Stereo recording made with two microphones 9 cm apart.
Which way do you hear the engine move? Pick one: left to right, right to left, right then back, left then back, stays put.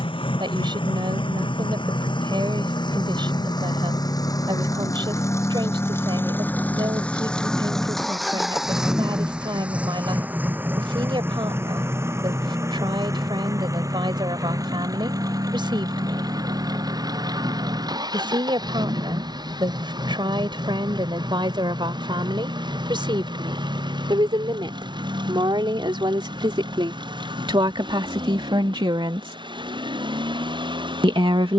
left to right.